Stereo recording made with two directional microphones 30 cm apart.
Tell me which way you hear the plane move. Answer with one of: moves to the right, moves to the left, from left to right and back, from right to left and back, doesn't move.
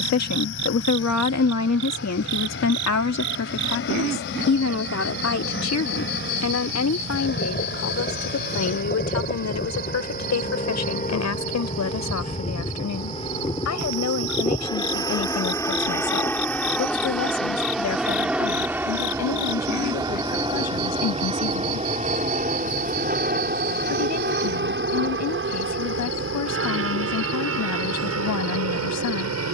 moves to the right.